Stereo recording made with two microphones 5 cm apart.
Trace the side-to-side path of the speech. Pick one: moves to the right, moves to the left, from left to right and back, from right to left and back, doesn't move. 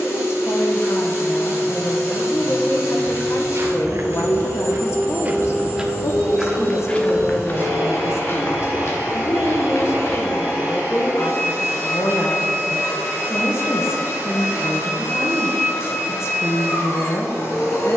doesn't move.